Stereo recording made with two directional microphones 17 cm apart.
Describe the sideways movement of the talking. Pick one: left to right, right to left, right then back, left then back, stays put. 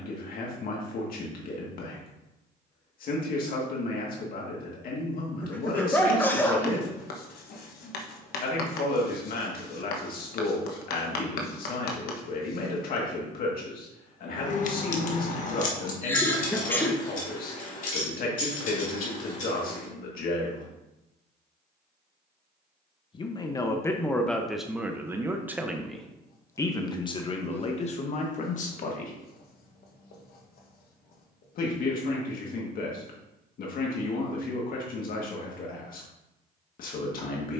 right then back.